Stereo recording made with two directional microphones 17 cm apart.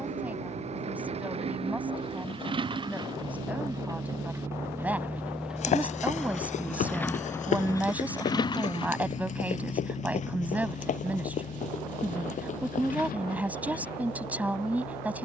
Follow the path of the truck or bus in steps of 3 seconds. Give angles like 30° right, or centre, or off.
40° right, 20° right, 20° left, 40° left, 60° left.